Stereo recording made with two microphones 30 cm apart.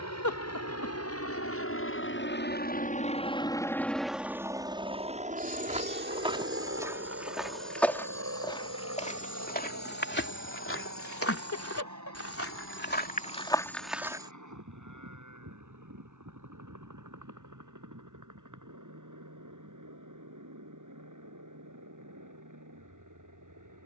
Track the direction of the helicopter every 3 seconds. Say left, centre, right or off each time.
left, centre, right, right, right, right, right, right.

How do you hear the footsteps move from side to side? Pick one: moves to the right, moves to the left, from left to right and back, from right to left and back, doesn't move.
from right to left and back.